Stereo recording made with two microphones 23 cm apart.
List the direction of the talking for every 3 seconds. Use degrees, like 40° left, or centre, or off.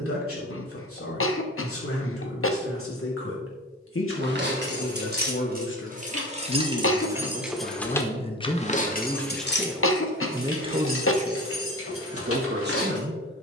70° left, 60° left, 30° left, 20° right, 50° right.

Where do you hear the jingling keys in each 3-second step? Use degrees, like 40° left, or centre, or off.
off, 50° right, centre, 60° left, 80° left.